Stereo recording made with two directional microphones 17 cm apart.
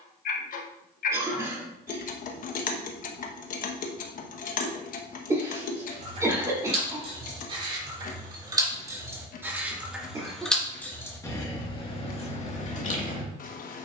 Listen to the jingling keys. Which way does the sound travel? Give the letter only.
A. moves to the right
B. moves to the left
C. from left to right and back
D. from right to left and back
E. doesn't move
B.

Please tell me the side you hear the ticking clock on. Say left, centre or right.
left.